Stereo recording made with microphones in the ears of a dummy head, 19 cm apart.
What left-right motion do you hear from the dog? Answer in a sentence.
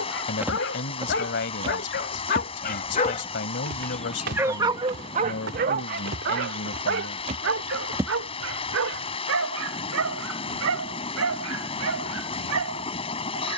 In this clip you hear the dog go from the left side to the right.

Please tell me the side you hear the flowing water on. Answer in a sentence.
You can hear the flowing water on the left.